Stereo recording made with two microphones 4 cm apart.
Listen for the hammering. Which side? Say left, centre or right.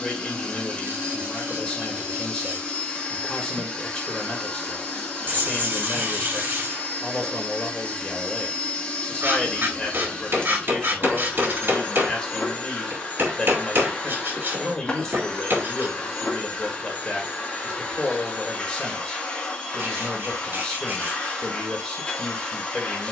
right.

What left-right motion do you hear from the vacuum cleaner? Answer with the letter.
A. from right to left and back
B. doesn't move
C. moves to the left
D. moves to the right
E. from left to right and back
B.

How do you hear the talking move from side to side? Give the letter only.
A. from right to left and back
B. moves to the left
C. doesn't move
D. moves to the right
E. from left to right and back
C.